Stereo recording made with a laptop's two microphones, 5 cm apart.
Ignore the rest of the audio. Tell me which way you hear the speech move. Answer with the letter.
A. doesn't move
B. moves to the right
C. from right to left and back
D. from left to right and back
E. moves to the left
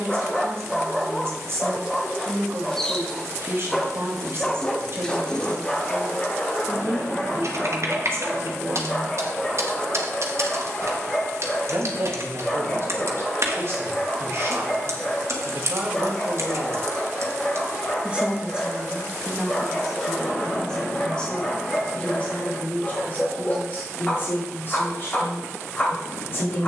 E.